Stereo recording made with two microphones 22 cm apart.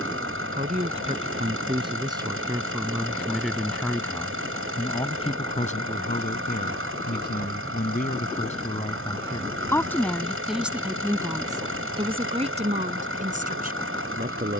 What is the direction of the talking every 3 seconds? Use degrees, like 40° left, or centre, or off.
20° right, 20° left, 40° left, centre, 40° right.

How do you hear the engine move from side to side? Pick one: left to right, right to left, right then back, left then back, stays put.
stays put.